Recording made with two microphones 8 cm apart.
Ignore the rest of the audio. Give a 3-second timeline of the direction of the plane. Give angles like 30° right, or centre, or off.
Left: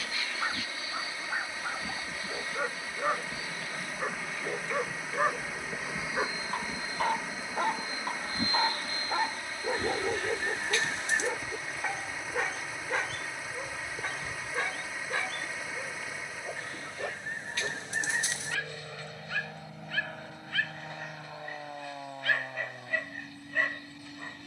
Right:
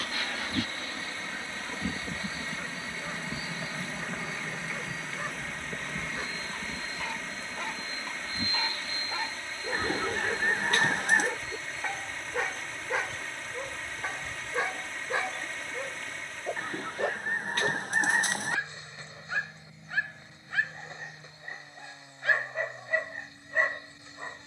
50° right, 10° right, 20° left, 40° left, 50° left, 60° left, 60° left, 70° left.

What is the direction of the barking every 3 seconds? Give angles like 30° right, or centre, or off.
70° left, 60° left, 40° left, 20° left, 10° right, 20° right, 20° right, 20° right.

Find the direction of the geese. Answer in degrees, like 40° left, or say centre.
50° right.